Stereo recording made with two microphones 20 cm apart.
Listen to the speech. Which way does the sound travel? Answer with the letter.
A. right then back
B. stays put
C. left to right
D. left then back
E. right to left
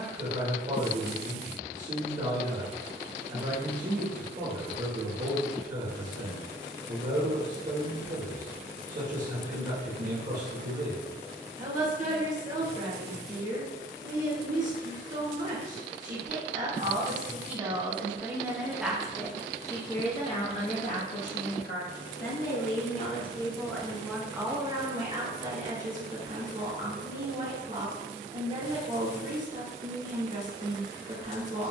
D.